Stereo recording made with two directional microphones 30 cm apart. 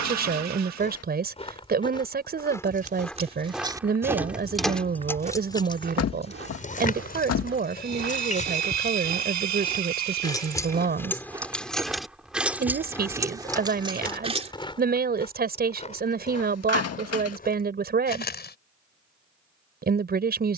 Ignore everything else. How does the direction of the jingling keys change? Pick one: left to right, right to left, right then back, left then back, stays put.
left then back.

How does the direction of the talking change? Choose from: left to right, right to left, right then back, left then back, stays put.
stays put.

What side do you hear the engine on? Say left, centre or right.
right.